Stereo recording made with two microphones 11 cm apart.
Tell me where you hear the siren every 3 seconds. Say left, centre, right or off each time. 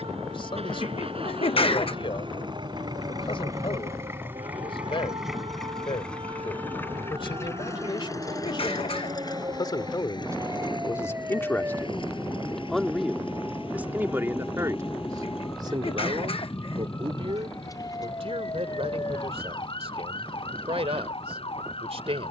right, right, right, right, centre, left, left, left.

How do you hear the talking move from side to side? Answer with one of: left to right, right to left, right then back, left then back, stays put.
left to right.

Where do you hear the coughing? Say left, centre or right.
left.